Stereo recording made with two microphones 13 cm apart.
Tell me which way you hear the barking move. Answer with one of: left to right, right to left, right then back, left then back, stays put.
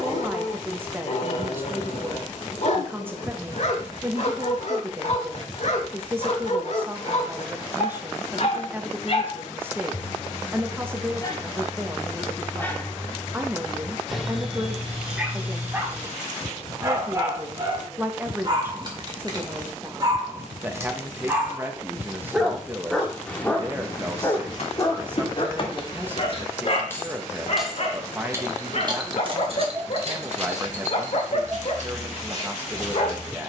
right then back.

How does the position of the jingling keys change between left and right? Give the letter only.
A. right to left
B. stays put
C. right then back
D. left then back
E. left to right
E.